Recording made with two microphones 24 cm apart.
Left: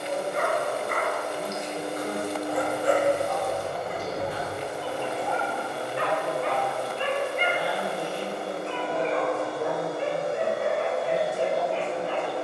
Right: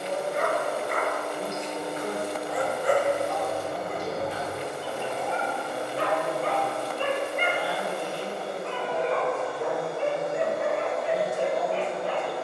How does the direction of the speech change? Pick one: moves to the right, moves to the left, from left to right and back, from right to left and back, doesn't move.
moves to the left.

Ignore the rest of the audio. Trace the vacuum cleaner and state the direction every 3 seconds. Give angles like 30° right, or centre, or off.
70° left, 70° left, 60° left, 30° left.